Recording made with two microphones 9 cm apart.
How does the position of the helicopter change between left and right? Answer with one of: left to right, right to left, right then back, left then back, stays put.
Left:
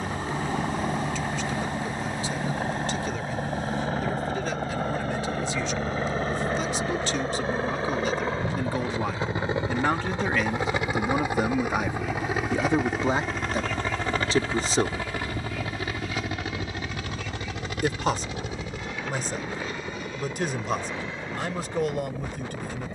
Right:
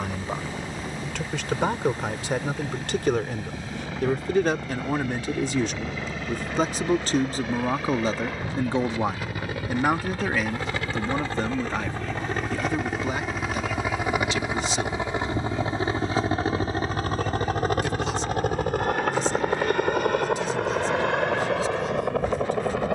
left to right.